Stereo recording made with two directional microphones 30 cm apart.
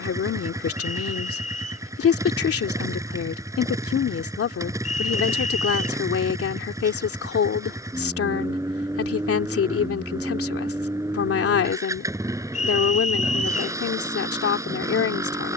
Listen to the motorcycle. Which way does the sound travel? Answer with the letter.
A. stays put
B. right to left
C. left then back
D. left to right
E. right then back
A.